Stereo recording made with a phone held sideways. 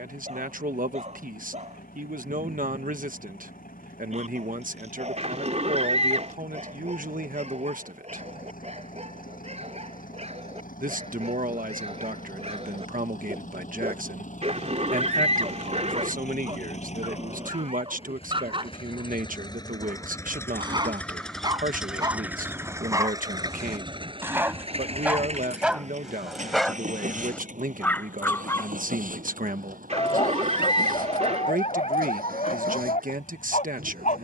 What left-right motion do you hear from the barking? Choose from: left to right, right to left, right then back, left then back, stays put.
right to left.